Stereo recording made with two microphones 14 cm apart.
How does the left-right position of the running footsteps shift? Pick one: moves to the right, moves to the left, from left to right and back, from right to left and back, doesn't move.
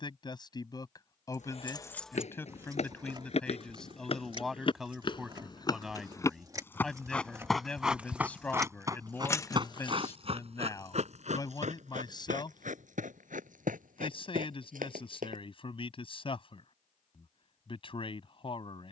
moves to the right.